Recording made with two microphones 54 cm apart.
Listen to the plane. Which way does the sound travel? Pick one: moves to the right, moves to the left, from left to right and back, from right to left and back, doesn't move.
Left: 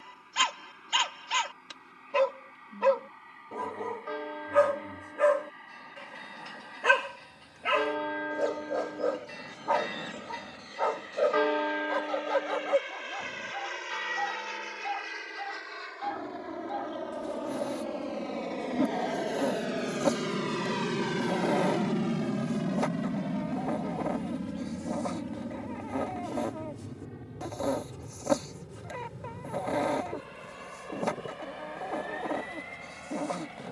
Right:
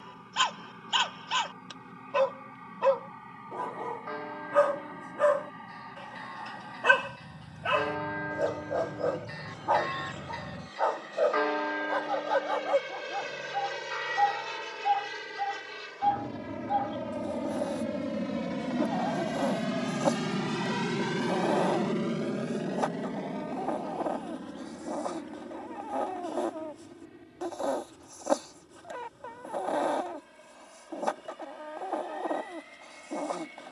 moves to the left.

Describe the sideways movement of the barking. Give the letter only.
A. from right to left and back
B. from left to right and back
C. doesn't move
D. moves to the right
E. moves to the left
C.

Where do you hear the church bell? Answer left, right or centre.
left.